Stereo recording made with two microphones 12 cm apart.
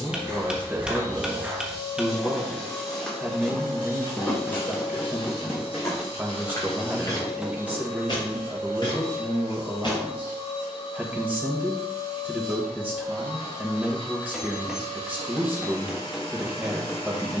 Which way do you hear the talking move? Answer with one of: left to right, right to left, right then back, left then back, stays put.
stays put.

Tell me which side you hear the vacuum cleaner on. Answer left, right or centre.
left.